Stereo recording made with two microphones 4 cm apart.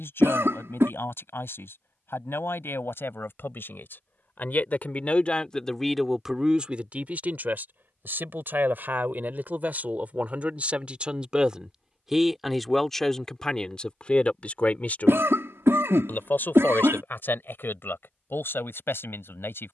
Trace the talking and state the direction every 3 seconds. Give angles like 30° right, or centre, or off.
70° left, 40° left, 40° right, 30° right, 20° left, 50° left, 60° left.